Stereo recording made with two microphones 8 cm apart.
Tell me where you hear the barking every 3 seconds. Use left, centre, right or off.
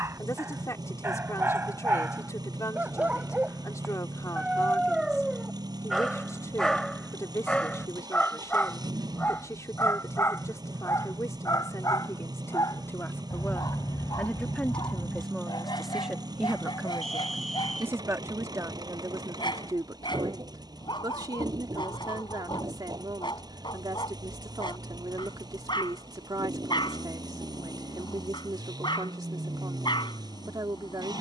right, centre, centre, left, left, left, left, left, left, left, left.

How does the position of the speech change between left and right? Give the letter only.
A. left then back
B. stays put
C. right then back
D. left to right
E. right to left
D.